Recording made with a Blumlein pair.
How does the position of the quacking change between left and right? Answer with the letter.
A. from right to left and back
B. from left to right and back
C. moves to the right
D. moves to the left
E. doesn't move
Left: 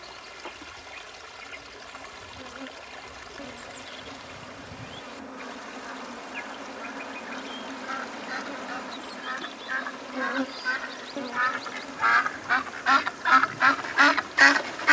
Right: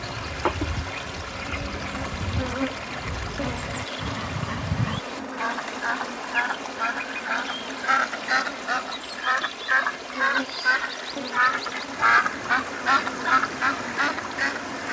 D.